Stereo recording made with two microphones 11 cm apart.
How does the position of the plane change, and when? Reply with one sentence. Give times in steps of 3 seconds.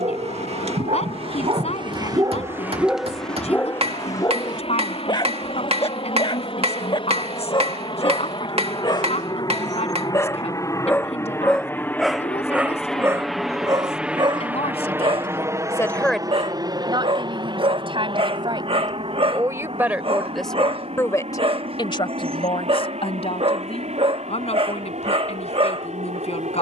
You can hear the plane on the left from 0 s, in the centre from 12 s and on the right from 15 s.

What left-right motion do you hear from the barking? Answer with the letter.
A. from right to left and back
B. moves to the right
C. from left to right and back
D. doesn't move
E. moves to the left
A.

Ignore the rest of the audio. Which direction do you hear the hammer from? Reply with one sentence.
In this clip you hear the hammer on the right.